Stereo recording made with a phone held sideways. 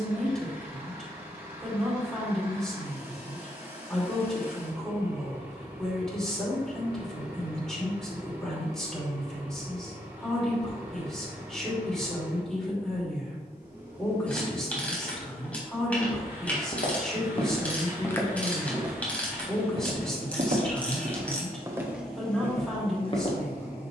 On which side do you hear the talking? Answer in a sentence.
In this clip you hear the talking in the centre.